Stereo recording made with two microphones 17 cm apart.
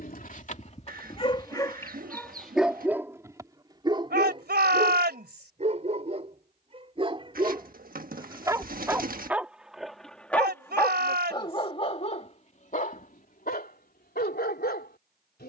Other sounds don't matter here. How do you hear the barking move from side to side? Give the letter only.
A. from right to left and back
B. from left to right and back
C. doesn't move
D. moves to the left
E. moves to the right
B.